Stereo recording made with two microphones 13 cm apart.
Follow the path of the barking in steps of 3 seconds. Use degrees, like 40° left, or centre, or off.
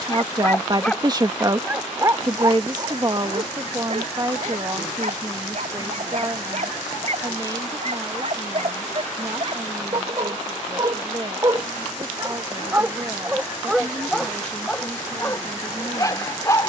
10° right, 60° right, 60° right, 40° right, 10° right, 20° left.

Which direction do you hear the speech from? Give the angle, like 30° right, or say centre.
30° right.